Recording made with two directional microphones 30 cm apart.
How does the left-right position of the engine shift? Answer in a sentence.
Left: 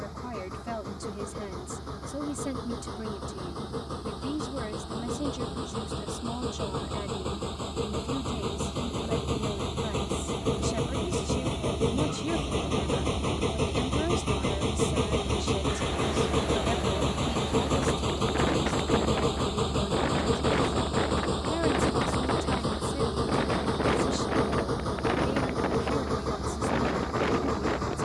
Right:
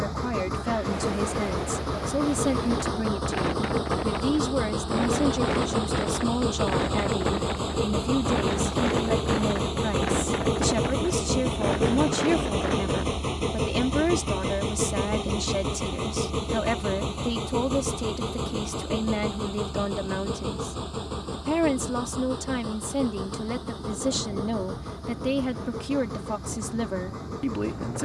In this clip you hear the engine go from the right side to the left.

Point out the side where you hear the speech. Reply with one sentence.
In this clip you hear the speech on the right.